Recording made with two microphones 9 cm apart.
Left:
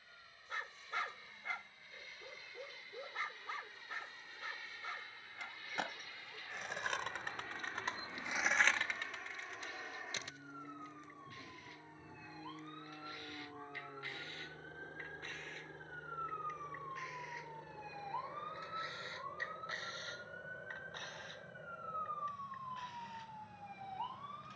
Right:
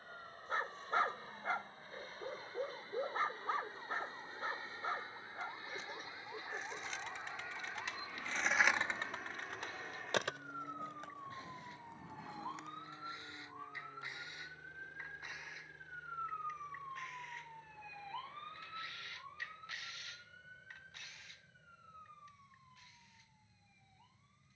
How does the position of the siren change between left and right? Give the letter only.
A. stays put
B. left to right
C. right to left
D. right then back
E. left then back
C.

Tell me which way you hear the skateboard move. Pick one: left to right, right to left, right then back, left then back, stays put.
left to right.